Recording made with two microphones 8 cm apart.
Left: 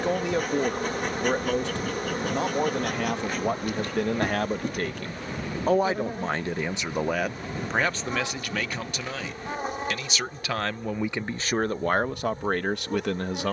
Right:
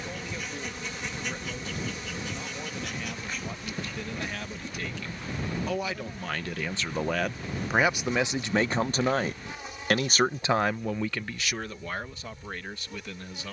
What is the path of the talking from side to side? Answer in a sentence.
In this clip you hear the talking move from left to right and back again.